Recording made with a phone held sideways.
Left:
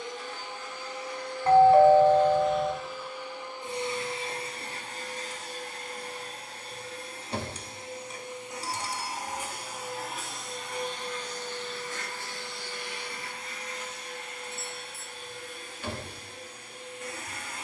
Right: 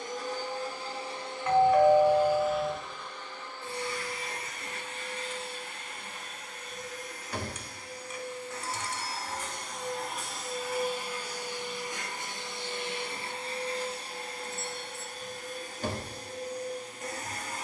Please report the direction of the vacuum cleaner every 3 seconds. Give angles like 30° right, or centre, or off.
20° right, 30° left, 20° left, centre, 30° right, 40° right.